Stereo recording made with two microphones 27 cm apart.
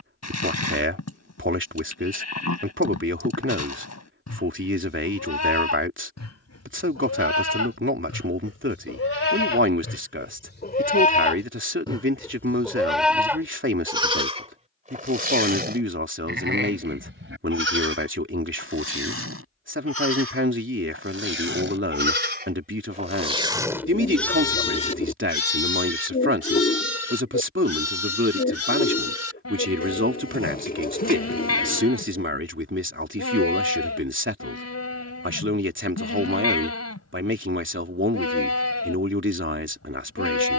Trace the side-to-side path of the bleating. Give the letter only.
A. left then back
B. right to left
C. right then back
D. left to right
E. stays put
C.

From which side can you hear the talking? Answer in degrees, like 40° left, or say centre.
50° right.